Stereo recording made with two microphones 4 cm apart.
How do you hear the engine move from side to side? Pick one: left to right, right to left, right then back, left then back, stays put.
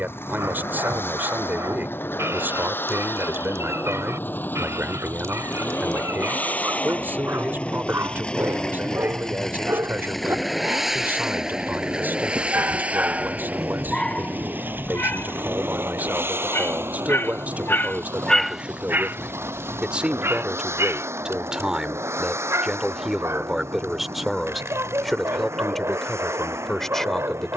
left to right.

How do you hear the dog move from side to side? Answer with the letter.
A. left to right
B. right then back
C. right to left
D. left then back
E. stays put
D.